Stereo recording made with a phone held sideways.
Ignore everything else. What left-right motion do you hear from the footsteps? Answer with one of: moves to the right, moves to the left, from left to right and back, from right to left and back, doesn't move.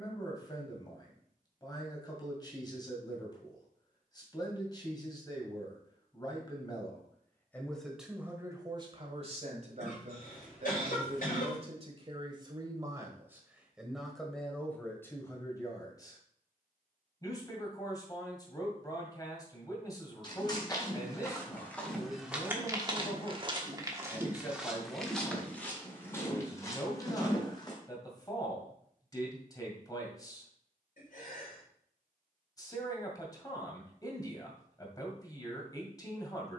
from left to right and back.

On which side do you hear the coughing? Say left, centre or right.
left.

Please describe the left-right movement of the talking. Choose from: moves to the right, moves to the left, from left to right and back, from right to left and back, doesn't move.
from left to right and back.